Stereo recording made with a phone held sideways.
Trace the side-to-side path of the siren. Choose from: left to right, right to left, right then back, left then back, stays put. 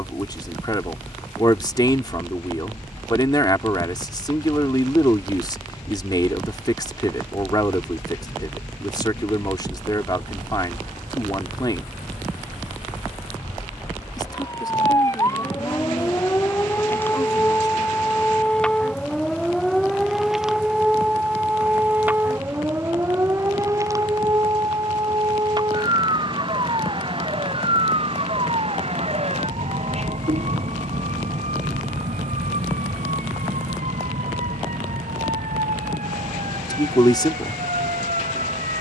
left to right.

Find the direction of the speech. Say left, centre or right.
left.